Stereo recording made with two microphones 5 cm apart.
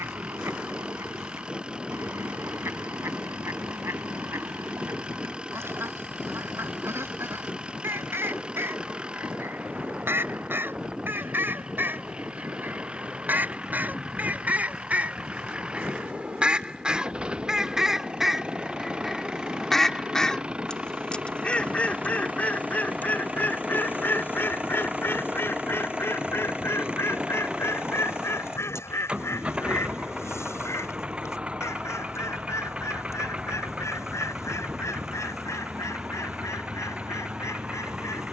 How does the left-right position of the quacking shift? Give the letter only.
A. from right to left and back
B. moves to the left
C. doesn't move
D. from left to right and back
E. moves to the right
B.